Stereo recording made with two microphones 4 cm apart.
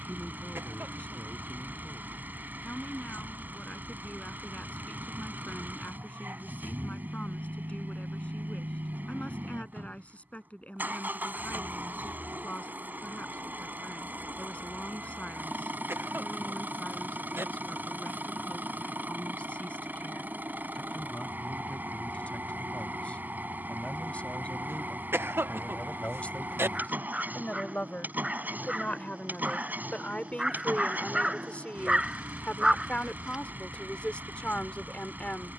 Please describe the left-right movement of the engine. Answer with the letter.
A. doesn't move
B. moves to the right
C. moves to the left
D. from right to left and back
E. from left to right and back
A.